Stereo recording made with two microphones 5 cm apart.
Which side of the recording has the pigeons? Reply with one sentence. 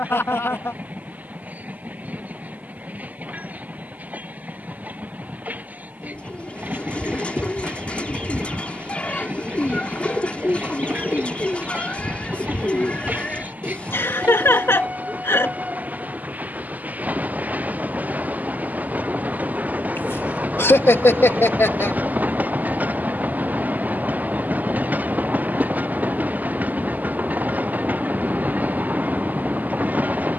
You can hear the pigeons on the left.